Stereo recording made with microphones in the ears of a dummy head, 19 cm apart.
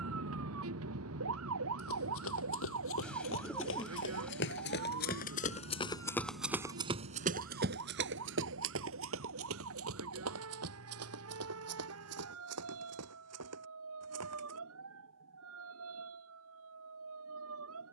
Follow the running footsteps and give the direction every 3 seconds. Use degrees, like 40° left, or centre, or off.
70° left, 50° left, 40° right, 80° right, 80° right, off.